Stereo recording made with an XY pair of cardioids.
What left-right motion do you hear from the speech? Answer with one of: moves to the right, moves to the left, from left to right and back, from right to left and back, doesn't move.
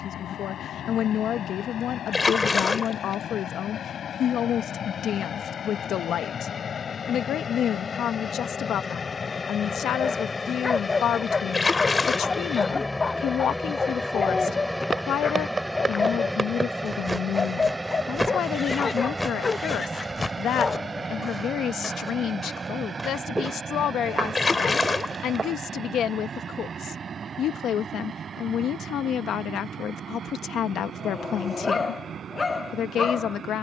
doesn't move.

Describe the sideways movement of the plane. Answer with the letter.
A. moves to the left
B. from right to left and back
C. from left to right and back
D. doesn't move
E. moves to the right
E.